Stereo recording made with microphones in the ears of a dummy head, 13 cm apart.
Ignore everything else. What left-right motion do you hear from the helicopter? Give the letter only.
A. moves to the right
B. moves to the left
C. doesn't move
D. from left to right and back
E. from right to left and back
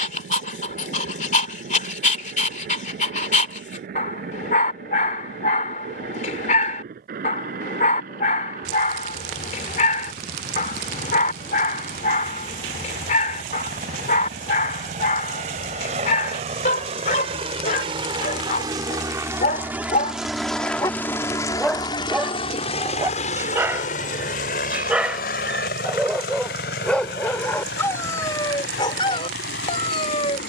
B.